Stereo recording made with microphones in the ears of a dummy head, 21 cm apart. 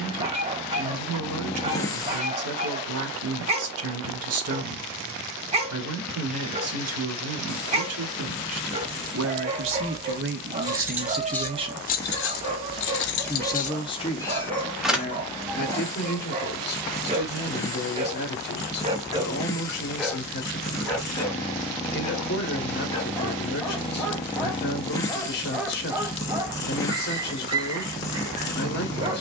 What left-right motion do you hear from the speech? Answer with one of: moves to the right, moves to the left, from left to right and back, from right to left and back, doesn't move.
moves to the left.